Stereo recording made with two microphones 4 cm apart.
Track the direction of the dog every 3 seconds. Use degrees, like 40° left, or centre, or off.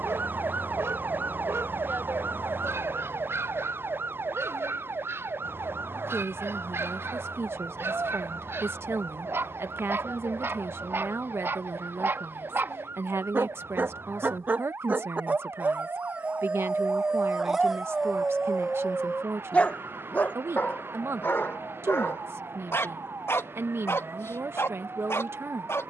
70° right, 70° right, 70° right, 60° right, 50° right, 20° right, 20° left, 60° left, 70° left.